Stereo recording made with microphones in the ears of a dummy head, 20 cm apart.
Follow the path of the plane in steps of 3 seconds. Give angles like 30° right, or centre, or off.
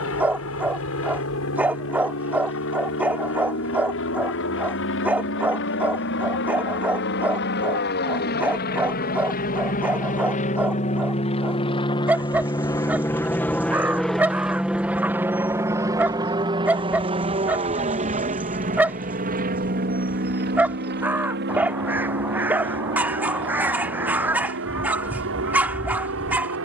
70° left, 60° left, 50° left, 30° left, 10° left, 20° right, 40° right, 50° right, 60° right.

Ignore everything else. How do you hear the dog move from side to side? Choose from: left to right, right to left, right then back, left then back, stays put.
stays put.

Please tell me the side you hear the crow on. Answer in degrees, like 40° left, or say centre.
10° right.